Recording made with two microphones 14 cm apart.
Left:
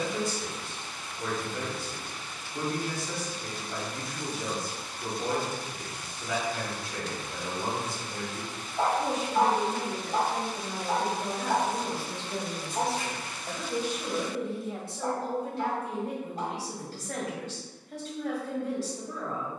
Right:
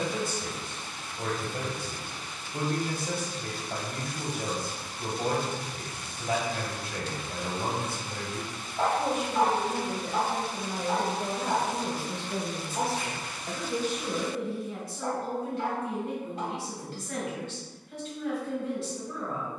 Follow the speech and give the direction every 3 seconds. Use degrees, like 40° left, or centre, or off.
50° right, 50° right, 50° right, 40° right, 10° left, 40° left, 40° left.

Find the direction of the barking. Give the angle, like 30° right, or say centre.
20° left.